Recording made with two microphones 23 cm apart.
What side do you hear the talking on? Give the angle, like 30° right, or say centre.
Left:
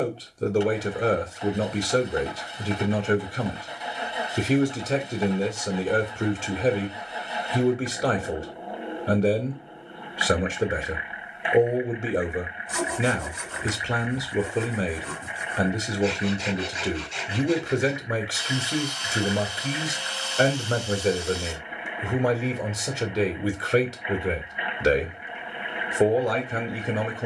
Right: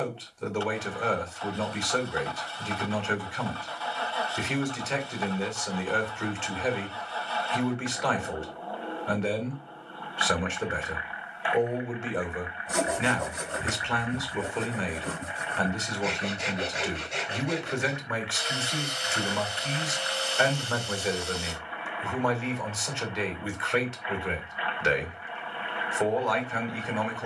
40° left.